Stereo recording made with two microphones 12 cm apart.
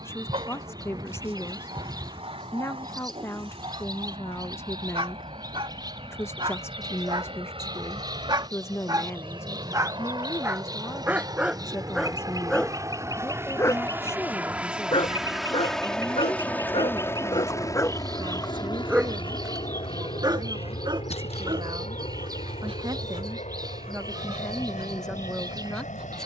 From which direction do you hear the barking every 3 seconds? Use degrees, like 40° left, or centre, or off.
50° right, 50° right, 40° right, 20° right, 20° left, 50° left, 20° right, 50° right, 60° right.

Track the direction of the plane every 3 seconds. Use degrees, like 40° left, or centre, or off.
60° right, 60° right, 50° right, 40° right, 20° right, 10° left, 40° left, 60° left, 70° left.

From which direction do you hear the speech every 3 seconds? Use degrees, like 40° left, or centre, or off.
20° left, 20° left, 20° left, 20° left, 20° left, 10° right, 50° right, 40° right, centre.